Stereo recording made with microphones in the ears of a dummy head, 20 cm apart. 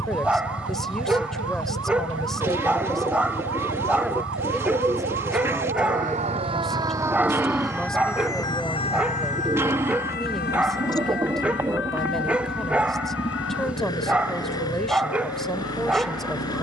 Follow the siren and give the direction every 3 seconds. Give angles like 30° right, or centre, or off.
70° right, 50° right, centre, 50° left, 60° left, 70° left.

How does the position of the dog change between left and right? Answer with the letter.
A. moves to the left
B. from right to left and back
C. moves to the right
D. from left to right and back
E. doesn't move
E.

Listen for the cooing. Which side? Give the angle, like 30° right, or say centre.
10° right.